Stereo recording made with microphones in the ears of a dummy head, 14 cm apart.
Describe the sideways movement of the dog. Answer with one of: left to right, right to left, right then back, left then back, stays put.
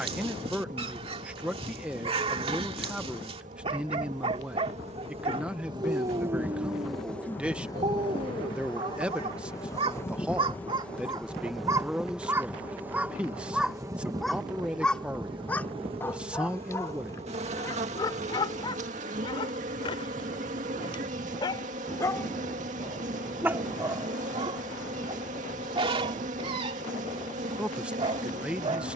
left then back.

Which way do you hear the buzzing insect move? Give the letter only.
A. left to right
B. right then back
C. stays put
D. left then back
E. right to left
D.